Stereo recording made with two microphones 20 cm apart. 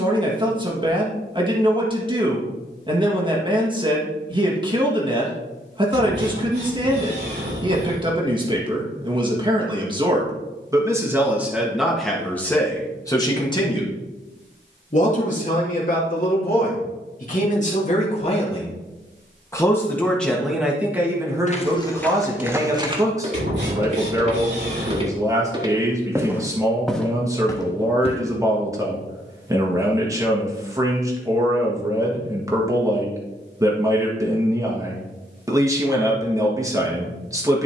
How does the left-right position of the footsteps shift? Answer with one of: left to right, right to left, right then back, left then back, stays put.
right then back.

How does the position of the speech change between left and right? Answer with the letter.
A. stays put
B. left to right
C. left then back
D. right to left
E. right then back
C.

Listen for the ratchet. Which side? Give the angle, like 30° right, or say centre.
60° right.